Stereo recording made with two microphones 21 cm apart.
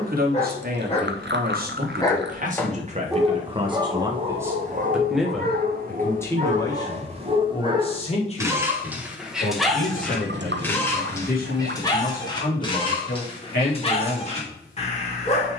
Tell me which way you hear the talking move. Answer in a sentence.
You can hear the talking travel towards the left.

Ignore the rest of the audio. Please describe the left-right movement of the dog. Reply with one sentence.
You can hear the dog move from left to right and back again.